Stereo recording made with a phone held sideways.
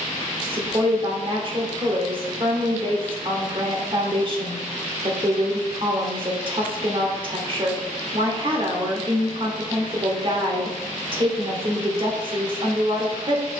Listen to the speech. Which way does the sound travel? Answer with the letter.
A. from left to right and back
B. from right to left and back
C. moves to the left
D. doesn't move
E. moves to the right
D.